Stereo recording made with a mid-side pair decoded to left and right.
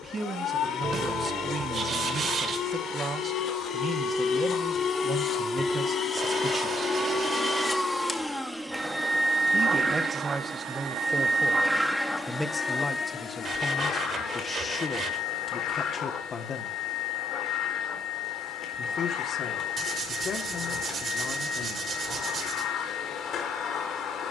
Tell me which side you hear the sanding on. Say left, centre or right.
right.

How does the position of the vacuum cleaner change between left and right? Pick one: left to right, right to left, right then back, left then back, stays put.
right then back.